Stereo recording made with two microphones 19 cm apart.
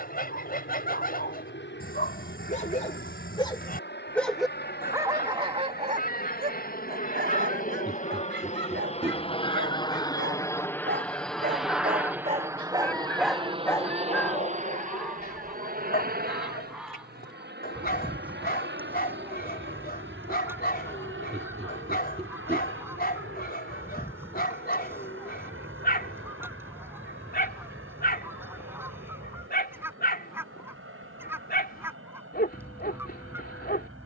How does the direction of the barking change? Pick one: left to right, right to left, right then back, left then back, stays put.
right then back.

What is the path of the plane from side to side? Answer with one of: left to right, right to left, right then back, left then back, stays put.
left to right.